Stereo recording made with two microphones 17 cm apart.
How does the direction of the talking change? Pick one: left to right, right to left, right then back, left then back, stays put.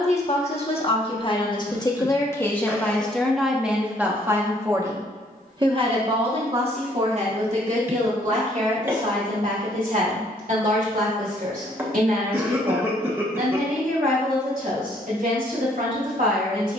left to right.